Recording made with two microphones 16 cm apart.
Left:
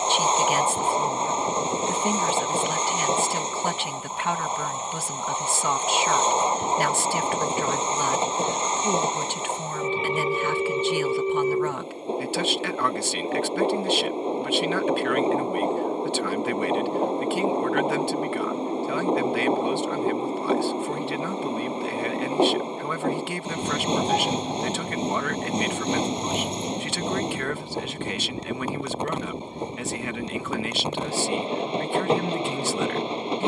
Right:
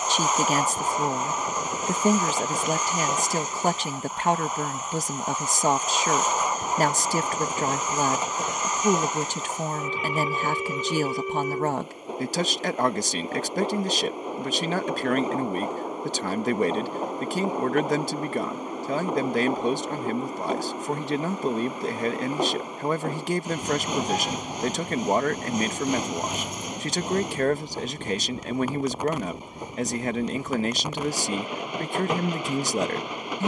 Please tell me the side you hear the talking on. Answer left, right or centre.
right.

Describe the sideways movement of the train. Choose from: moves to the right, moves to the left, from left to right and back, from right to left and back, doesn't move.
doesn't move.